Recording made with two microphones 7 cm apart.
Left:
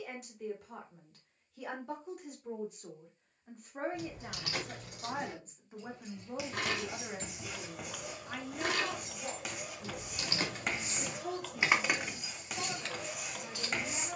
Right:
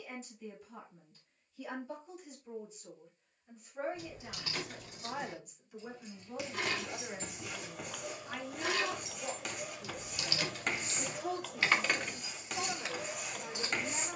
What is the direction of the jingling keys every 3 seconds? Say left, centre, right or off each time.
off, left, left, left, centre.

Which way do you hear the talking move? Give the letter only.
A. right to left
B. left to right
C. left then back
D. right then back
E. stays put
B.